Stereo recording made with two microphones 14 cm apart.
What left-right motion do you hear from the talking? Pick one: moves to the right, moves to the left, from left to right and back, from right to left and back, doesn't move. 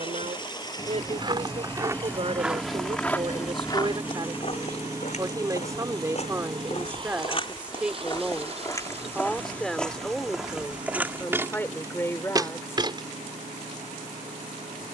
moves to the left.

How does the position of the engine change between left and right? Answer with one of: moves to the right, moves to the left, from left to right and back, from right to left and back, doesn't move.
moves to the right.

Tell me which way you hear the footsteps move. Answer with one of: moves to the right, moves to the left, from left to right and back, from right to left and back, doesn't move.
from right to left and back.